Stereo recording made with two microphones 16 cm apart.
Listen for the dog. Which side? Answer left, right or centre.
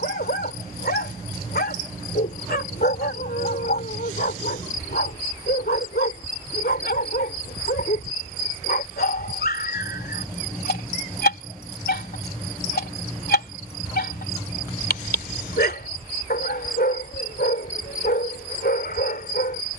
left.